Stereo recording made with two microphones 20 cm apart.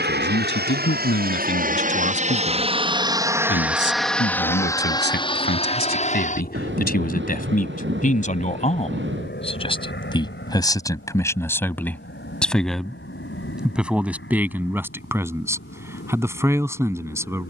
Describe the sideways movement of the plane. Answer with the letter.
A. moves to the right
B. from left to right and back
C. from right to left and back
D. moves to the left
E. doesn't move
D.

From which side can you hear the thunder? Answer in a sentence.
In this clip you hear the thunder on the right.